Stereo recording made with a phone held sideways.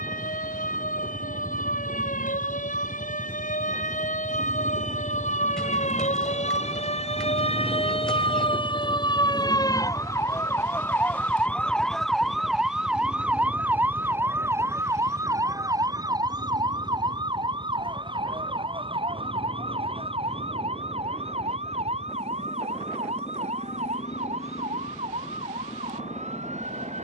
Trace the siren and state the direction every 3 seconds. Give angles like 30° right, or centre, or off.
80° left, 70° left, 50° left, 20° left, 10° right, 30° right, 40° right, 50° right, 50° right.